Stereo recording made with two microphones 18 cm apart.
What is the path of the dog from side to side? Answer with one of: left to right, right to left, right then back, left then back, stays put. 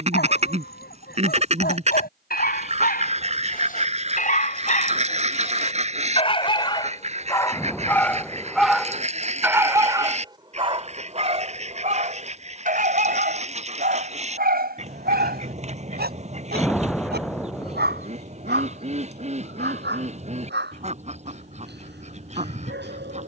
left to right.